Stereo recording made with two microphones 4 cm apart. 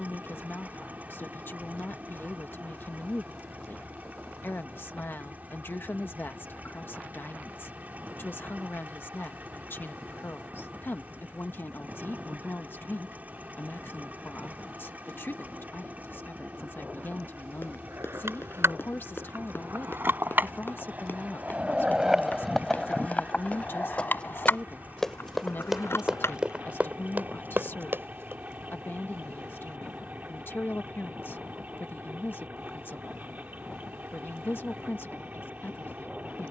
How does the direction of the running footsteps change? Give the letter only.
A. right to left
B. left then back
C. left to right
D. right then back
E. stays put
C.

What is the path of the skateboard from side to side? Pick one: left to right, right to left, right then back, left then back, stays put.
right to left.